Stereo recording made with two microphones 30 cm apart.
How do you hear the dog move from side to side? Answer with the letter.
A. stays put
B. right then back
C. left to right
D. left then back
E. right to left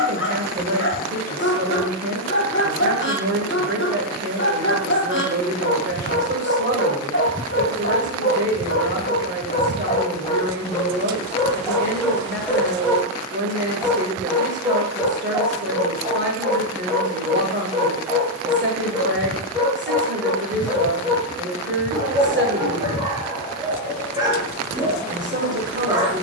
C.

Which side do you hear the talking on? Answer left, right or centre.
right.